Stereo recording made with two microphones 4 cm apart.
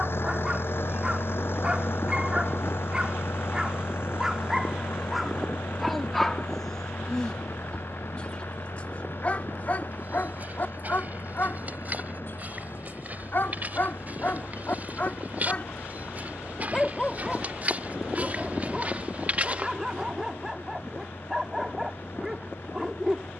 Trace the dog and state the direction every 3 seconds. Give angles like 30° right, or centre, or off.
20° right, 10° right, 10° left, 40° left, 50° left, 20° left, 10° right, 10° right.